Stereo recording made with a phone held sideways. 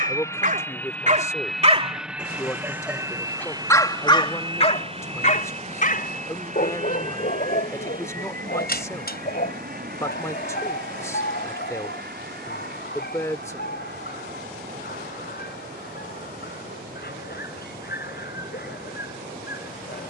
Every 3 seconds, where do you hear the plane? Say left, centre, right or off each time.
centre, right, right, right, right, right, right.